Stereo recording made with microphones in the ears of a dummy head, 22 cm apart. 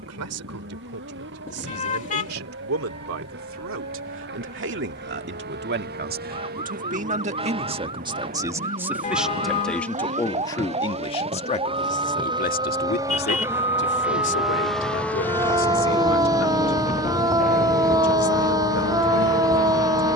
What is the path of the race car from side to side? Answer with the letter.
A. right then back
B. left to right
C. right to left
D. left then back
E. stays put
C.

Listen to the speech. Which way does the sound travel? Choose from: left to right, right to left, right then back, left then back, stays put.
right to left.